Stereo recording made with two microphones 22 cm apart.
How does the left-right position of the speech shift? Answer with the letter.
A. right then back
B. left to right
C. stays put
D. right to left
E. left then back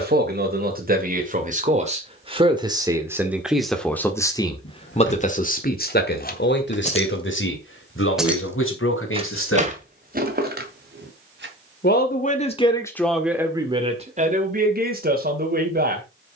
E.